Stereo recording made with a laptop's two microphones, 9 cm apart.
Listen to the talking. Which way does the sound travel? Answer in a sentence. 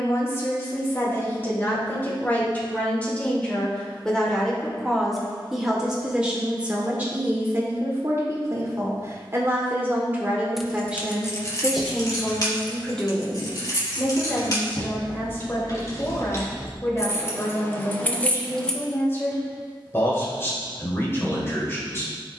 You can hear the talking go right and come back.